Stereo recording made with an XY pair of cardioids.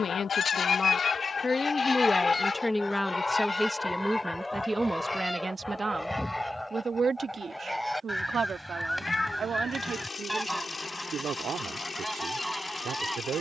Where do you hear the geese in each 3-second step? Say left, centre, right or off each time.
left, centre, centre, centre, centre.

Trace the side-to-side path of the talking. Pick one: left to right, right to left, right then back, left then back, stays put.
left to right.